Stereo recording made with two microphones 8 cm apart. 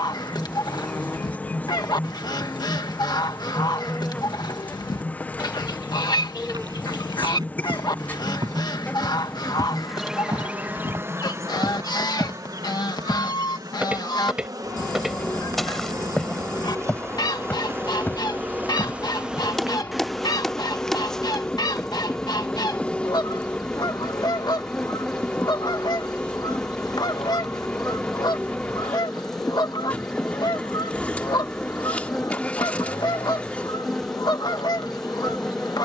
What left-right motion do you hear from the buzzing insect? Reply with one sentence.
You can hear the buzzing insect go right and come back.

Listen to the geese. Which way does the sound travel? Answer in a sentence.
You can hear the geese stay in one place.